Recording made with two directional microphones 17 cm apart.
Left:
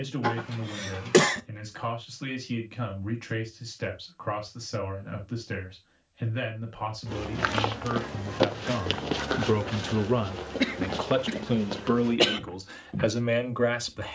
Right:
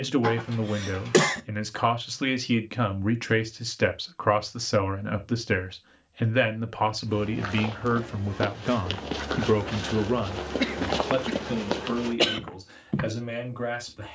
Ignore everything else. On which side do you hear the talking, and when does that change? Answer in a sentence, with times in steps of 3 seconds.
In this clip you hear the talking on the right from 0 s, in the centre from 9 s and on the left from 12 s.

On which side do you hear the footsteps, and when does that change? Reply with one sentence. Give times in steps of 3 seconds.
You can hear the footsteps not at all from 0 s, on the left from 6 s and on the right from 9 s.